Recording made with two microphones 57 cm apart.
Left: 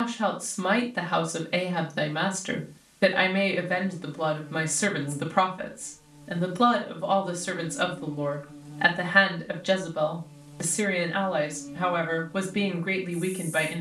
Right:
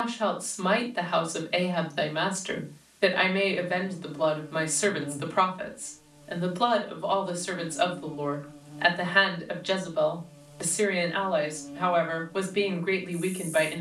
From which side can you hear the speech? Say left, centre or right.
left.